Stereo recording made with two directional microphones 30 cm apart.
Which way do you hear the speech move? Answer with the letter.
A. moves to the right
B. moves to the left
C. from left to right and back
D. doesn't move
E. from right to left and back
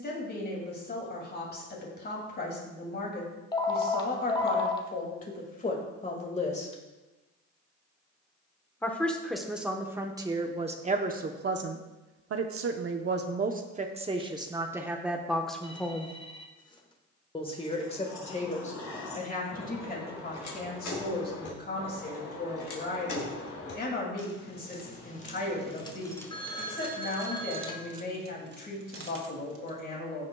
C.